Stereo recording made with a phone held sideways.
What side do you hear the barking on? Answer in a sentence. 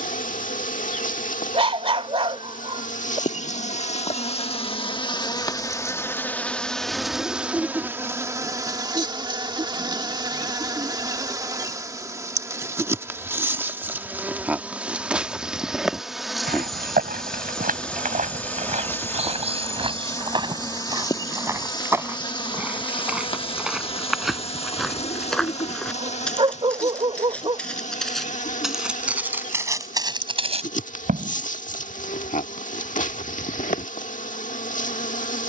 You can hear the barking on the right.